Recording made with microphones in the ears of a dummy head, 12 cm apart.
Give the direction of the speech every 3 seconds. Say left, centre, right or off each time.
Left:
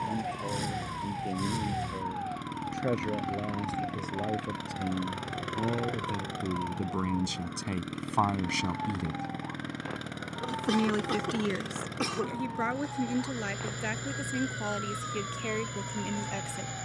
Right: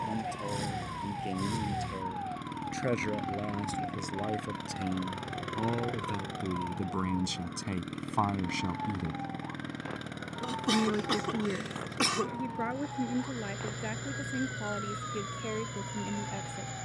right, right, centre, left, left, left.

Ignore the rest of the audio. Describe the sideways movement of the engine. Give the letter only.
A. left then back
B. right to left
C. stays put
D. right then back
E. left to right
C.